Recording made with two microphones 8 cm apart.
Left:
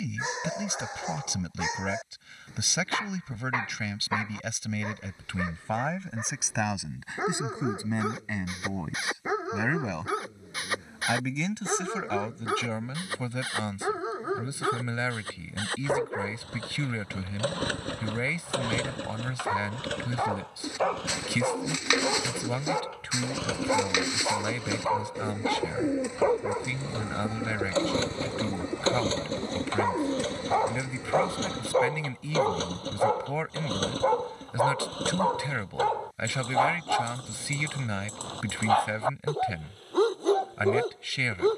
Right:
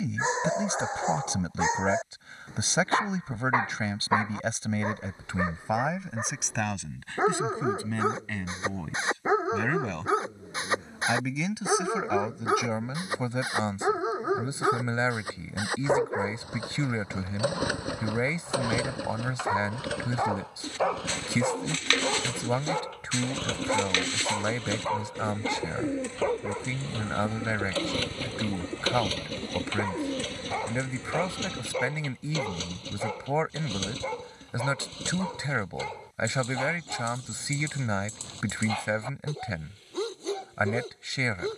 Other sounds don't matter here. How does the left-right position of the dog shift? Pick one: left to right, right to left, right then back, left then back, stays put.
right to left.